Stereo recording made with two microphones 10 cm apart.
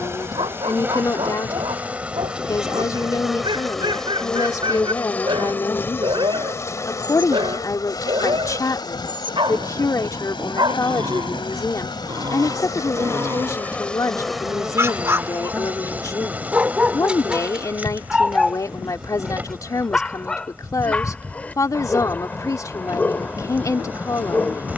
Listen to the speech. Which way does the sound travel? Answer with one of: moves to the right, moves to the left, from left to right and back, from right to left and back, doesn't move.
doesn't move.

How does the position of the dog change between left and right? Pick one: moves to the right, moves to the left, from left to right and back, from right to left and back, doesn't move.
moves to the left.